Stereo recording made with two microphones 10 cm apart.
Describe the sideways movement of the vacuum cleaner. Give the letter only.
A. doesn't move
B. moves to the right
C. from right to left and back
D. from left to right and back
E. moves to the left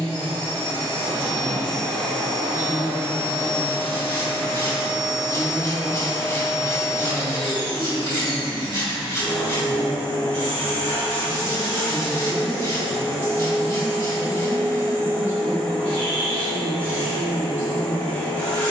A.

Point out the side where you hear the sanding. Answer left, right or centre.
left.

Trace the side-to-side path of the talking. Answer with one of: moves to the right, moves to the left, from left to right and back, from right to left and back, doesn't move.
from right to left and back.